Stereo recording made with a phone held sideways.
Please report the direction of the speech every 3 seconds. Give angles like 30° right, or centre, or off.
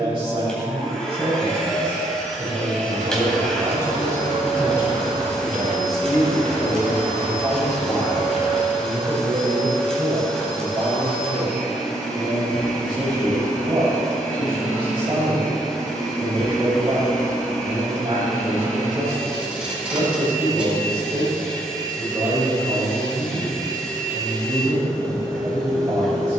40° right, 20° right, centre, 30° right, 40° right, 40° right, 40° right, 40° right, 40° right.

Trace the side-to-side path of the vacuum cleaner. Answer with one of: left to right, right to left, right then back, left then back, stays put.
stays put.